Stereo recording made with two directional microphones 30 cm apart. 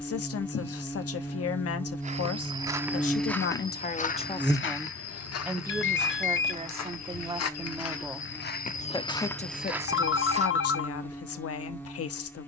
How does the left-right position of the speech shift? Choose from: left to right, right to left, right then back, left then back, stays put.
right then back.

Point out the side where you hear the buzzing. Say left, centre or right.
centre.